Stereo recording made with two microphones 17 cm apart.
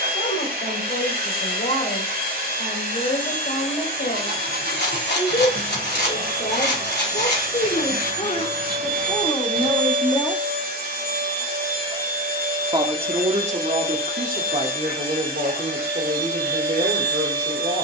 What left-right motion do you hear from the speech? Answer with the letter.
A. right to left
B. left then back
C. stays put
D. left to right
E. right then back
D.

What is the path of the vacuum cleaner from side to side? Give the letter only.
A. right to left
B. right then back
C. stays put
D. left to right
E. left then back
C.